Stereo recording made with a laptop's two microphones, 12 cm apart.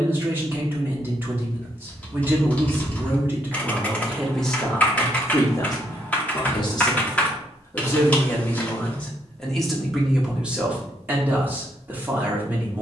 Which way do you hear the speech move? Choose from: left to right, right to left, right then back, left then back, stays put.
left then back.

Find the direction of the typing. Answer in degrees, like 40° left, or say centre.
10° left.